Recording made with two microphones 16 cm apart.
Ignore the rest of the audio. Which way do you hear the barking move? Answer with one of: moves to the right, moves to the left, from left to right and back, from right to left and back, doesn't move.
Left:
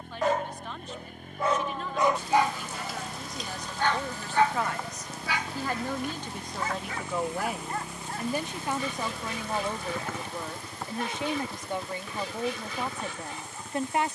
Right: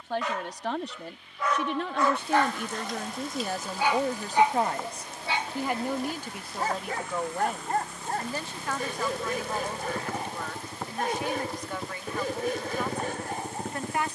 moves to the right.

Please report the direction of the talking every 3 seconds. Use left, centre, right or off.
right, right, centre, left, left.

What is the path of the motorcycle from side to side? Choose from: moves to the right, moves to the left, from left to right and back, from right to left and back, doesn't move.
moves to the right.